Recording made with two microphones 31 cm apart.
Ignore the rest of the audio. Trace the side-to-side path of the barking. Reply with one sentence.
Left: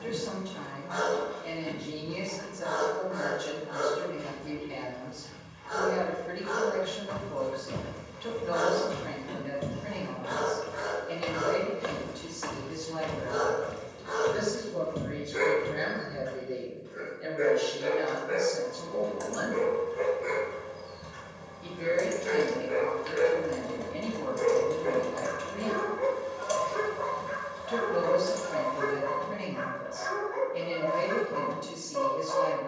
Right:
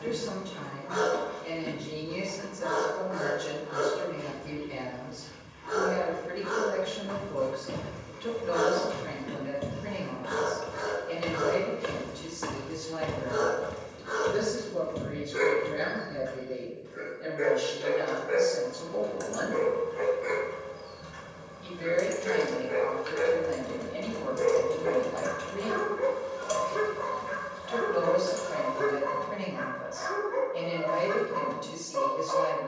In this clip you hear the barking move from right to left and back again.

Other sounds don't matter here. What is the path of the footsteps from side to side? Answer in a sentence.
You can hear the footsteps go right and come back.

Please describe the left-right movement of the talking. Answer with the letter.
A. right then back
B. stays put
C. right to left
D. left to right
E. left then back
C.